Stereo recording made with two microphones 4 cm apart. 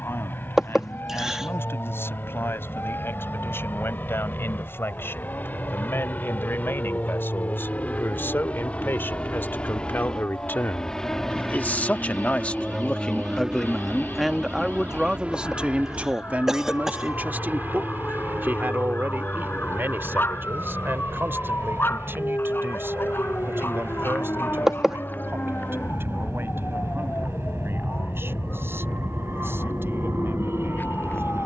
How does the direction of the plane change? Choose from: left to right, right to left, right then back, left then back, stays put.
left to right.